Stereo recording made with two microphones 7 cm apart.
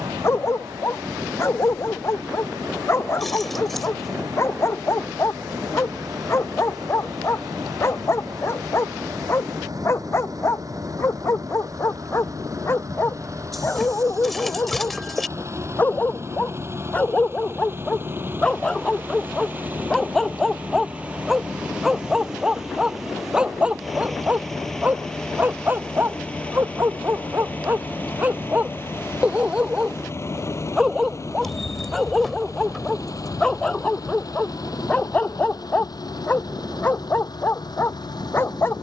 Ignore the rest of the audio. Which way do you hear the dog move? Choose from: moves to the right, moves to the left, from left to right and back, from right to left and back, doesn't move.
from left to right and back.